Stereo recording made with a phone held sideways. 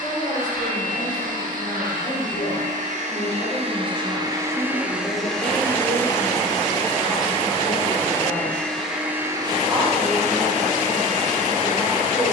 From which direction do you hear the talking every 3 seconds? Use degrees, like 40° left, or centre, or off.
60° left, 30° left, centre, 10° right.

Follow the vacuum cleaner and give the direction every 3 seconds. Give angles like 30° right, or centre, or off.
70° right, 20° right, 20° left, 50° right.